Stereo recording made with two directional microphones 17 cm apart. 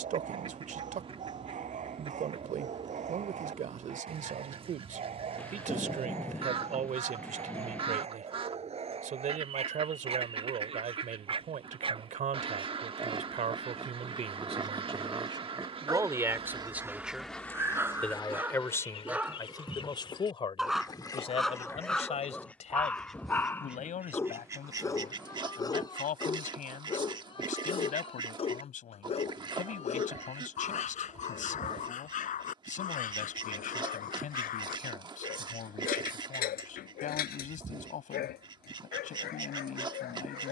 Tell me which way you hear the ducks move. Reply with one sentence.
You can hear the ducks go left and come back.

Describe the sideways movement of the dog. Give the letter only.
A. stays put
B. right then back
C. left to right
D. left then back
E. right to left
E.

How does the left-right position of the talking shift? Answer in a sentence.
You can hear the talking move from right to left.